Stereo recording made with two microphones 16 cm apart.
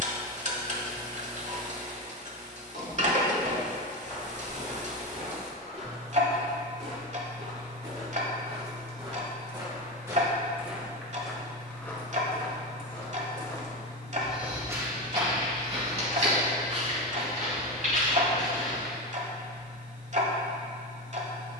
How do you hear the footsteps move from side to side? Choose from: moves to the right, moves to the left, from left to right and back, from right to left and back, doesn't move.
from right to left and back.